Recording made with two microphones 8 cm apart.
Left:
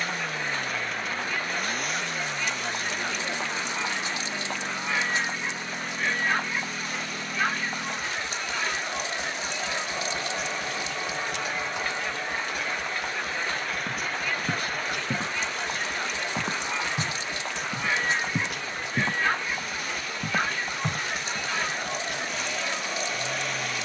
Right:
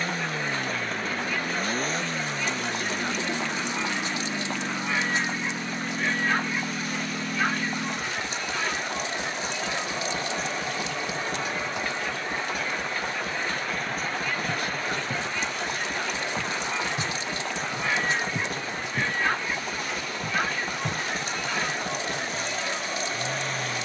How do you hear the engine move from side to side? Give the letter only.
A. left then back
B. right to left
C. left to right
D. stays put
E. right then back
D.